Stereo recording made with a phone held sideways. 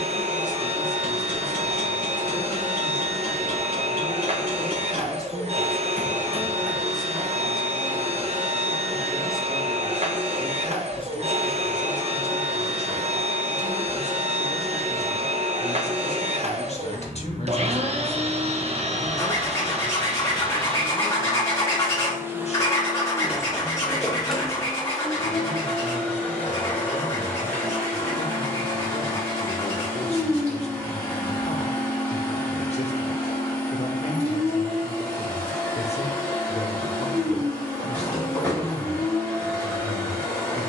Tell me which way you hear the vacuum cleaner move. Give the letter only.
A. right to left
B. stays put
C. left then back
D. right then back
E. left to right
A.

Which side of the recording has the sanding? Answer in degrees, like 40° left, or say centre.
20° left.